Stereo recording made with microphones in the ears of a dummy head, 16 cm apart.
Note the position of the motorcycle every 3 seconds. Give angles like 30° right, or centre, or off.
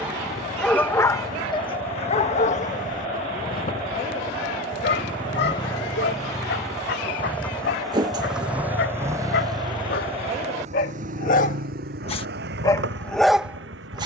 40° left, 30° left, 10° left, 40° right, 70° right.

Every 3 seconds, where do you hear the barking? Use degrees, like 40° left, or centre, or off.
30° left, 60° left, 70° left, 50° left, 10° left.